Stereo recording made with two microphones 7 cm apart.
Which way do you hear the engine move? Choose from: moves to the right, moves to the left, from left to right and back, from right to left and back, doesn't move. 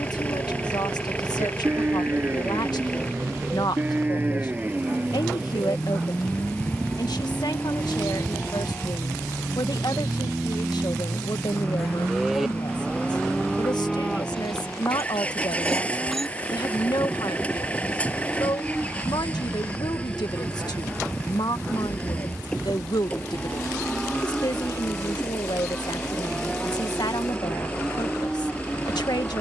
doesn't move.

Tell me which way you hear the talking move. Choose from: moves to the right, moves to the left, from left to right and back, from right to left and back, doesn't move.
doesn't move.